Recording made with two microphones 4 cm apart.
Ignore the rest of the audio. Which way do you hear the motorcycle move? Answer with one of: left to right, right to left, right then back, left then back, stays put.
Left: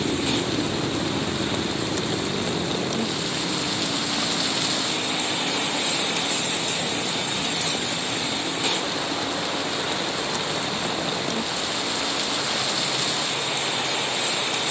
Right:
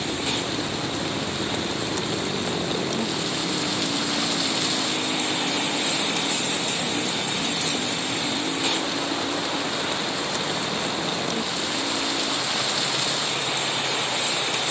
left to right.